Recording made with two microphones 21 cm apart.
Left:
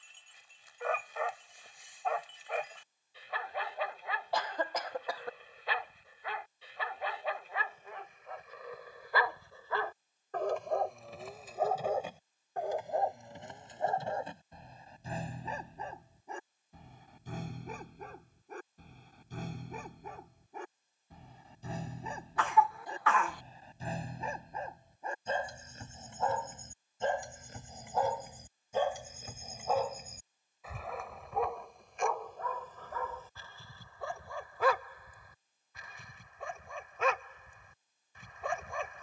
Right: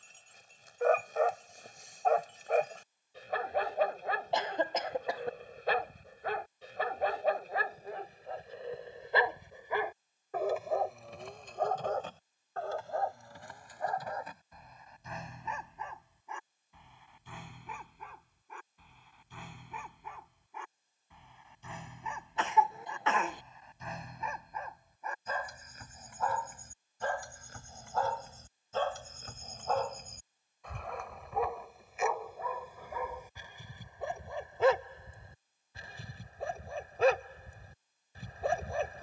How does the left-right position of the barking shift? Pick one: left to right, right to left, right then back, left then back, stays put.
left then back.